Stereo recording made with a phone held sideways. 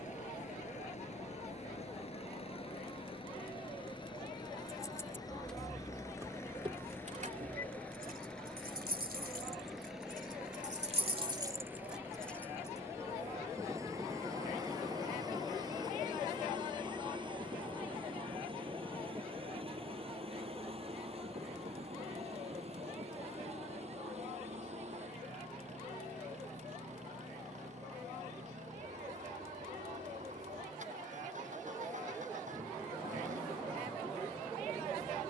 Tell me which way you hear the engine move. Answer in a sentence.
You can hear the engine travel towards the right.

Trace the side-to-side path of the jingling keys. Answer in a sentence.
You can hear the jingling keys go right and come back.